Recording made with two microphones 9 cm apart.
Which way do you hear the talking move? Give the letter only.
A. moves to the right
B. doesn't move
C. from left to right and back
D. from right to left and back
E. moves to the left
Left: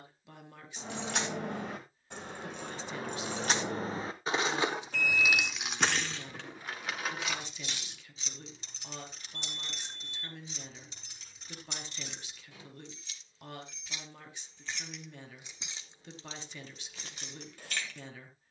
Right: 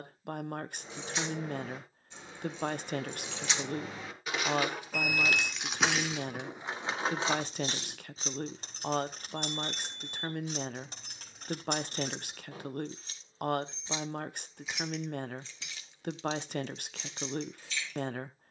B.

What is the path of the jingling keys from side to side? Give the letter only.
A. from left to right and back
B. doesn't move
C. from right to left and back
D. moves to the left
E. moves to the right
A.